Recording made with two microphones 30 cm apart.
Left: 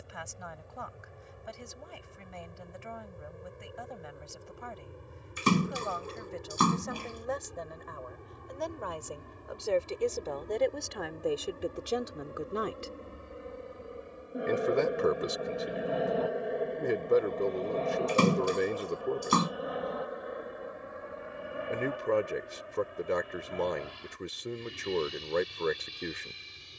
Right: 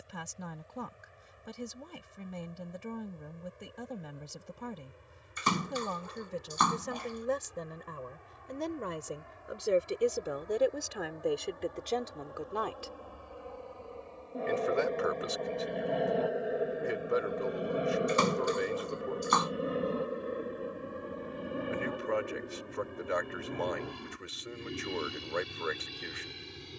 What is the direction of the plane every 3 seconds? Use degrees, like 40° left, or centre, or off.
70° left, 60° left, 50° left, 40° left, 20° left, centre, 30° right, 40° right, 60° right.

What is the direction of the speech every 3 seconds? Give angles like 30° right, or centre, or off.
50° right, 50° right, 40° right, 10° right, 30° left, 50° left, 50° left, 50° left, 50° left.